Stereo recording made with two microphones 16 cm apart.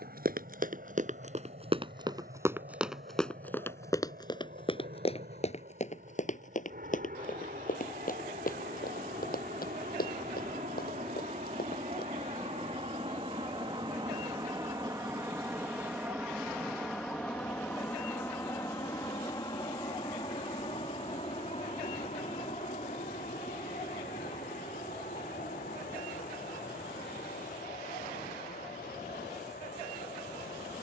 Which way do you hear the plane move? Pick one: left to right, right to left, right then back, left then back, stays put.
right to left.